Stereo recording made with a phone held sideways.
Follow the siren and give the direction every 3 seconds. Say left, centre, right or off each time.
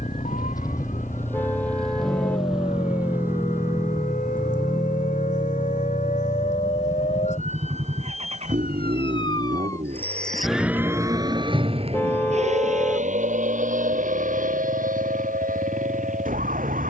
left, left, left, centre, right, right.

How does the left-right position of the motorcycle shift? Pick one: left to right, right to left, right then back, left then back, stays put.
left to right.